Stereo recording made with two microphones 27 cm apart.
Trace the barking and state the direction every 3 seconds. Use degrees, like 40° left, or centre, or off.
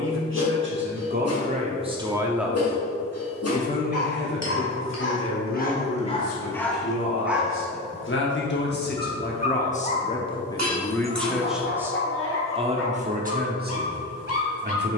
60° left, 50° left, 10° left, 30° left, 50° left.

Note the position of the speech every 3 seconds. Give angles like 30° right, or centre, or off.
30° right, 50° left, 50° left, 20° left, 30° right.